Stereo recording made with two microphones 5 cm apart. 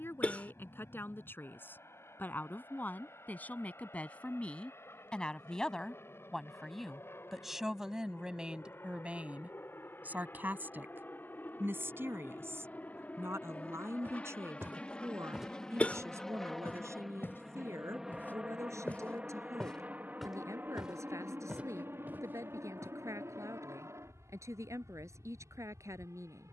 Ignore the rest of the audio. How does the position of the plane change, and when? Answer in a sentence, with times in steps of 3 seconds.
You can hear the plane on the left from 0 s, in the centre from 15 s and on the right from 18 s.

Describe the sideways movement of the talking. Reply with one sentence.
You can hear the talking go from the left side to the right.